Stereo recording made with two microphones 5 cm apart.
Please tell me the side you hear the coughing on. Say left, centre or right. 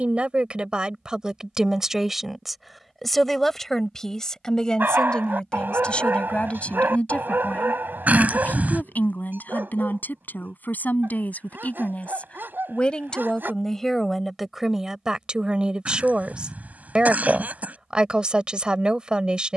right.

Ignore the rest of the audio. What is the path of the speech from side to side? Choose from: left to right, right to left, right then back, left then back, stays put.
left then back.